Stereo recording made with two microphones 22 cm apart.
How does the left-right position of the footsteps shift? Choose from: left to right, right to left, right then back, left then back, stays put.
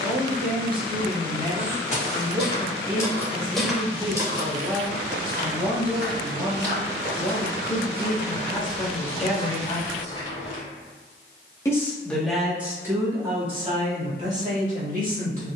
right then back.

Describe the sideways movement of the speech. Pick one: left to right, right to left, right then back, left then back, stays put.
left then back.